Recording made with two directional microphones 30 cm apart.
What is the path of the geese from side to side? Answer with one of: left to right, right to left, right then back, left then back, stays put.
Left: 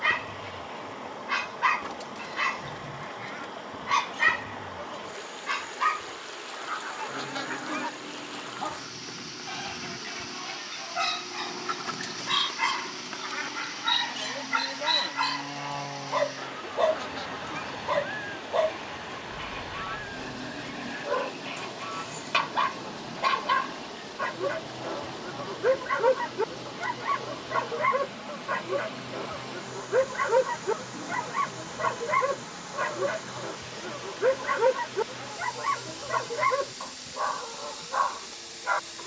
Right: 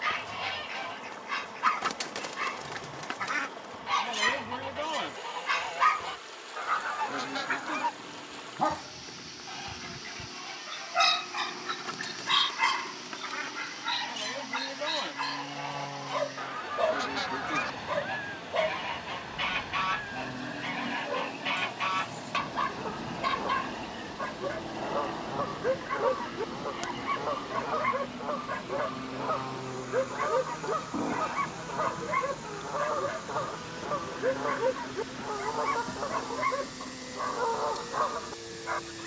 left then back.